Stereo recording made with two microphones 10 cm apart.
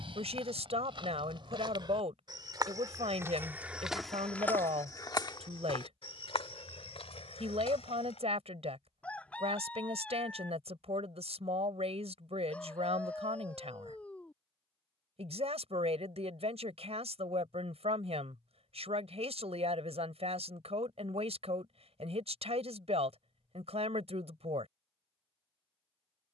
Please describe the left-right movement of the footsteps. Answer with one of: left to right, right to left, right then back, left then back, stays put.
right to left.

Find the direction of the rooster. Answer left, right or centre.
centre.